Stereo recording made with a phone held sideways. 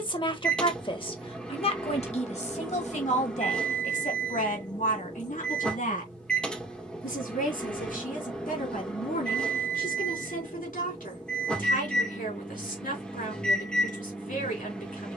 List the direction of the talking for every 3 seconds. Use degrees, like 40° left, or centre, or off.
40° left, 60° left, 70° left, 80° left, 80° left.